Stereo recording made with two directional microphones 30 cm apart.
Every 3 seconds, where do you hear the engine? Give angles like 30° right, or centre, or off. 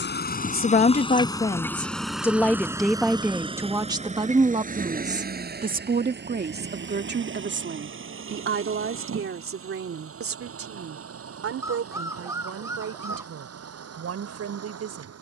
10° left, 20° right, 40° right, 50° right, 50° right.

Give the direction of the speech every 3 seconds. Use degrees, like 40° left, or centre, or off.
10° left, 20° right, 40° right, 50° right, 50° right.